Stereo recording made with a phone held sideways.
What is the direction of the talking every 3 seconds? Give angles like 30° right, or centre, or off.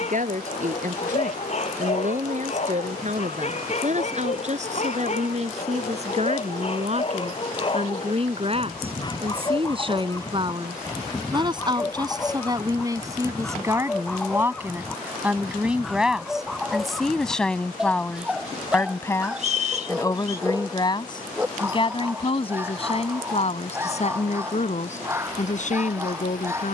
50° right, 50° right, 40° right, 30° right, 20° right, centre, 20° left, 40° left, 50° left.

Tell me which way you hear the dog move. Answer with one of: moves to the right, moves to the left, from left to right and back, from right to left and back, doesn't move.
moves to the right.